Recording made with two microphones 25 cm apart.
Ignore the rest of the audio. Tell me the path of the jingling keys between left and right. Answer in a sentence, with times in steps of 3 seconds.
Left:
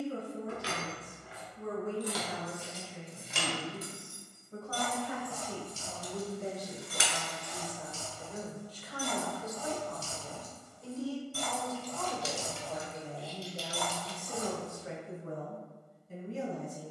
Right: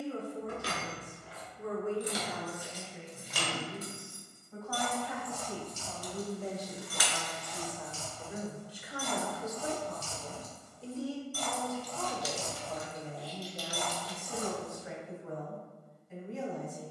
In this clip you hear the jingling keys on the right from 0 s, on the left from 3 s, in the centre from 12 s and not at all from 15 s.